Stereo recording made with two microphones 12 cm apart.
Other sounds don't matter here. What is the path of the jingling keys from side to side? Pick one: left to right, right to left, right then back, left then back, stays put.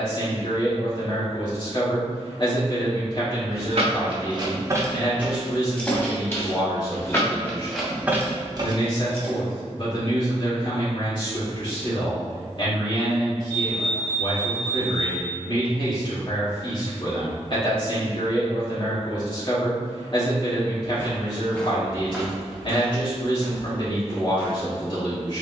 left then back.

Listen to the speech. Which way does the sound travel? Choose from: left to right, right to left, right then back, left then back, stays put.
stays put.